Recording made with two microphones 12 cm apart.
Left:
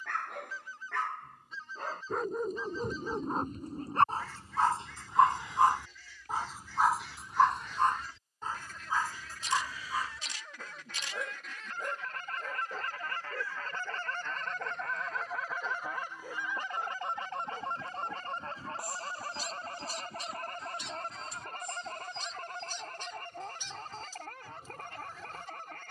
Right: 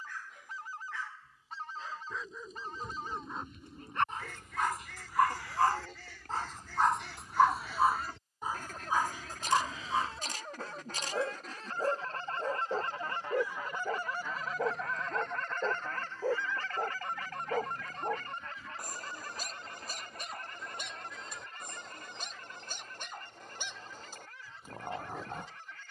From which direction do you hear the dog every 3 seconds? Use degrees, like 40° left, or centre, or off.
60° left, 30° left, centre, 30° right, 40° right, 50° right, 50° right, 60° right, 60° right.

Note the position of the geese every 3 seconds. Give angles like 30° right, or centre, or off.
70° right, 70° right, 60° right, 40° right, 20° right, 20° left, 40° left, 60° left, 60° left.